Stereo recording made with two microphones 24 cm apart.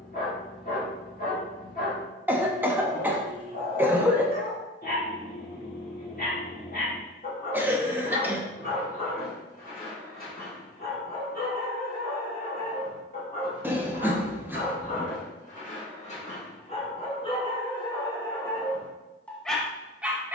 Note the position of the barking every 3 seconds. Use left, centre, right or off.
left, left, left, left, left, left, centre.